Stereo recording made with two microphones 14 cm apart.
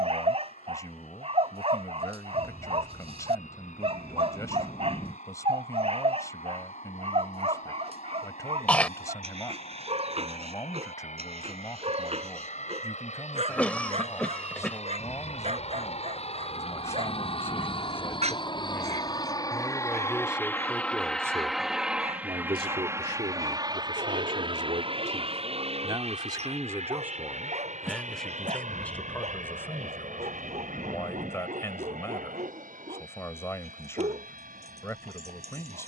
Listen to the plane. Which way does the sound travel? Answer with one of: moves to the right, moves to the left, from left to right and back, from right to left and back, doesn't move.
moves to the right.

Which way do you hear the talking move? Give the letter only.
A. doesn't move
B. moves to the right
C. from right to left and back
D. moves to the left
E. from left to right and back
E.